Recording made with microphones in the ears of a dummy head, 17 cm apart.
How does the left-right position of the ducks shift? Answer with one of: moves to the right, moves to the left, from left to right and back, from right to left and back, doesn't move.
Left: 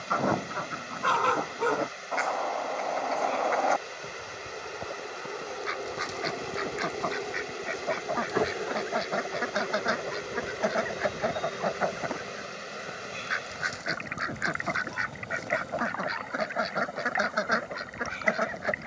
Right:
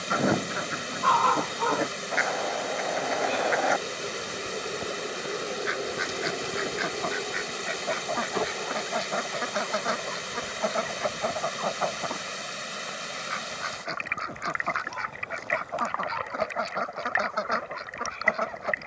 moves to the left.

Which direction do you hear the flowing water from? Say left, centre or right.
right.